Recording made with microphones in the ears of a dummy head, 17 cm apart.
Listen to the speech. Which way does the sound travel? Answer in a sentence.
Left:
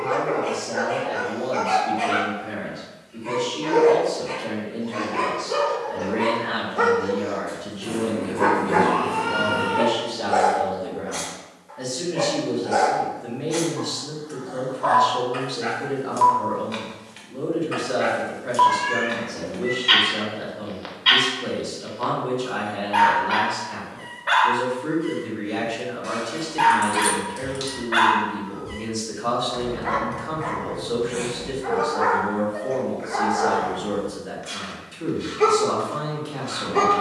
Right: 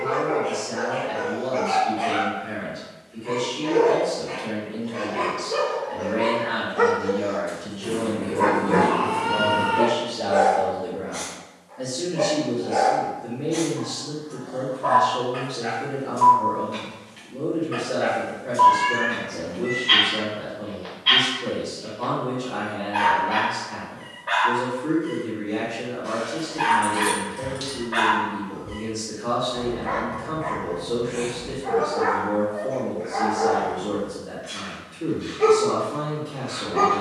You can hear the speech move to the left.